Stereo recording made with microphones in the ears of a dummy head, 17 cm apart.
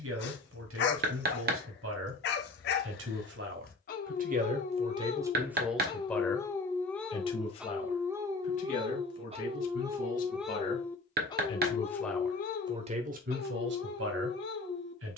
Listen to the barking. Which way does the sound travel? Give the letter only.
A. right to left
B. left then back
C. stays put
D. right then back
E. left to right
D.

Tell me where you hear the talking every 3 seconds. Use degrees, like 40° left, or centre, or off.
80° right, 30° right, 30° left, 40° left, 50° right.